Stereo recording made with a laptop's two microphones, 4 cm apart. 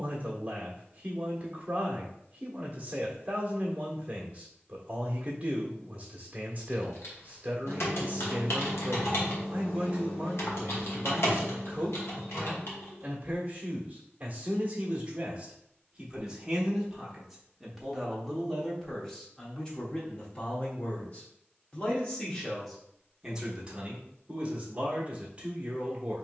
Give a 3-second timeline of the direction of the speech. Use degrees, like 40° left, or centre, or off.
30° right, 30° right, 30° right, 30° right, 30° right, 10° right, 20° left, centre, 30° right.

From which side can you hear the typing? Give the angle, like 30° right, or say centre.
70° left.